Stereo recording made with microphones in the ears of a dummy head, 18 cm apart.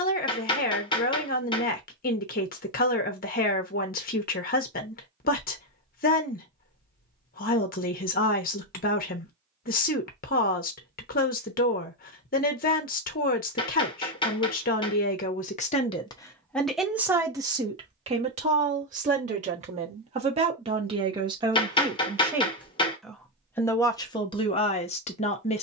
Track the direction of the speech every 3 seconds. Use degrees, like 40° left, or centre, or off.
40° left, 40° left, 40° left, 40° left, 40° left, 10° left, 30° right, 10° right, 30° left.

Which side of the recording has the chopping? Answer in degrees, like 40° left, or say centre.
20° left.